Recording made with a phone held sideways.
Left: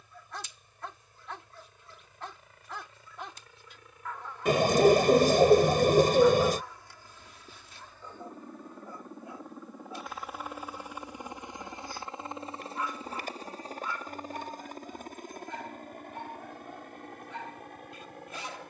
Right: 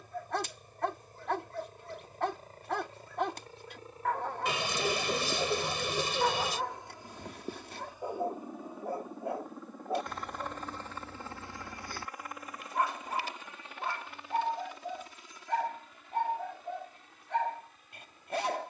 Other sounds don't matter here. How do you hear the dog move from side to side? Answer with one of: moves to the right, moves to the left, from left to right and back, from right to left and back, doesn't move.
doesn't move.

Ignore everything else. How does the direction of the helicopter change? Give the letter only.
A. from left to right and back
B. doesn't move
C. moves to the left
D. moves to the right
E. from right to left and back
C.